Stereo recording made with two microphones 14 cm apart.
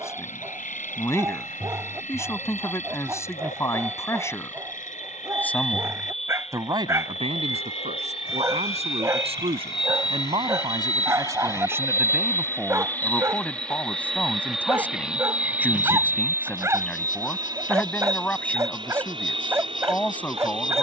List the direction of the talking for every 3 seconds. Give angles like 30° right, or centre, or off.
20° left, 20° left, 50° right, 30° right, centre, 10° left, 10° left.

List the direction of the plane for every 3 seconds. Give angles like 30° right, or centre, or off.
70° left, 60° left, 50° left, 30° left, 10° left, 20° right, 40° right.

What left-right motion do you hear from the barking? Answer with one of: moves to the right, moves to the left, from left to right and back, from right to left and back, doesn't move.
doesn't move.